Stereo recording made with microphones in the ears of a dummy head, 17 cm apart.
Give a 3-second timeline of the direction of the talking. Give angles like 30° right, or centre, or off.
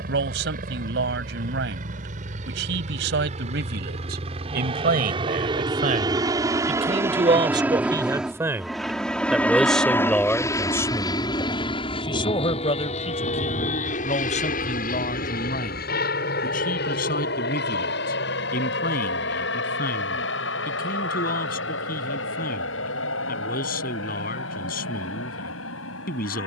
60° right, 50° right, 20° right, 10° left, 30° left, 50° left, 50° left, 50° left, 50° left.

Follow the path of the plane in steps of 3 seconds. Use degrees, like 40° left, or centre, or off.
50° right, 30° right, 10° right, 20° left, 40° left, 50° left, 60° left, 70° left, 70° left.